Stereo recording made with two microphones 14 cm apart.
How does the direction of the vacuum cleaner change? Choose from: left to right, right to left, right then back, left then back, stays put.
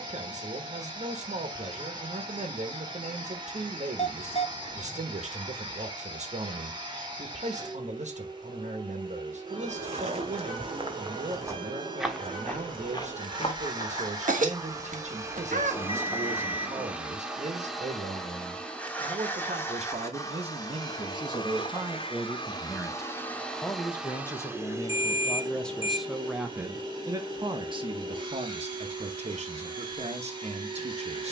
left then back.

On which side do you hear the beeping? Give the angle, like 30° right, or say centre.
40° left.